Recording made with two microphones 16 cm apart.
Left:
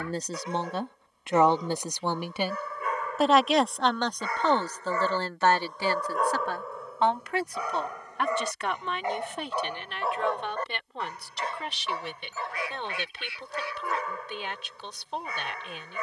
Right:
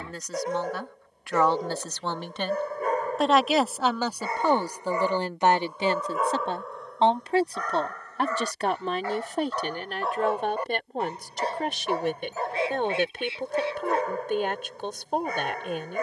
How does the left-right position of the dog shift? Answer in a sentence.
In this clip you hear the dog move from right to left and back again.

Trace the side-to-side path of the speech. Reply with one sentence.
In this clip you hear the speech go from the left side to the right.